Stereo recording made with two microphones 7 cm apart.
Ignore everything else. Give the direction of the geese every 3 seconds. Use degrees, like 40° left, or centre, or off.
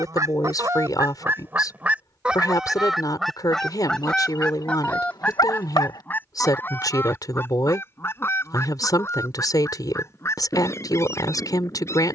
30° right, 10° left, 30° left, 40° left.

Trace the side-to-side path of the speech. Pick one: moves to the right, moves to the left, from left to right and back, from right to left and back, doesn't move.
doesn't move.